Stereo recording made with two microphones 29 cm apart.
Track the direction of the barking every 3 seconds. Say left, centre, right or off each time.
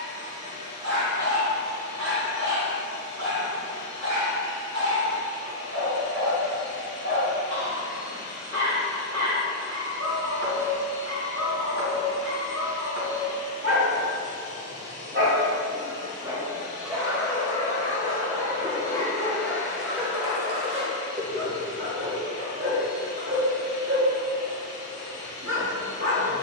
right, right, right, right, right, centre, centre, right, right.